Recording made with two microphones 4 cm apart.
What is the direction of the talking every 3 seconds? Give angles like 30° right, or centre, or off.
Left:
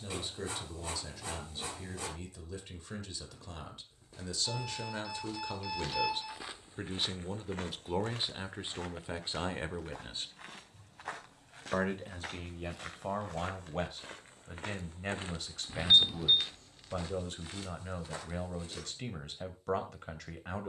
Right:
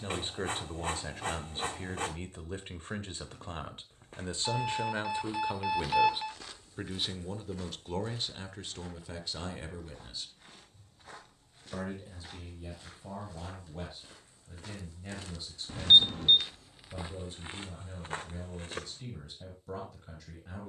40° right, 30° right, 10° left, 40° left, 60° left, 60° left, 60° left.